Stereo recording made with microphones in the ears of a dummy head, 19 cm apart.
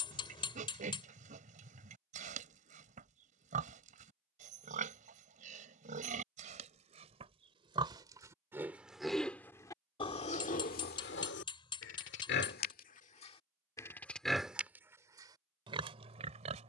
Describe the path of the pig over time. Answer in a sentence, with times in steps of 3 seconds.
In this clip you hear the pig on the right from 0 s, on the left from 9 s and on the right from 15 s.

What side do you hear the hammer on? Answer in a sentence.
You can hear the hammer on the left.